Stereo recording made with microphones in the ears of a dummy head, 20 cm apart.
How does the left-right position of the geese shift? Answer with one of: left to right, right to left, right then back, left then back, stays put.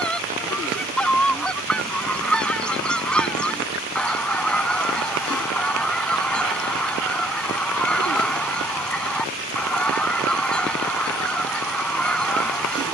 stays put.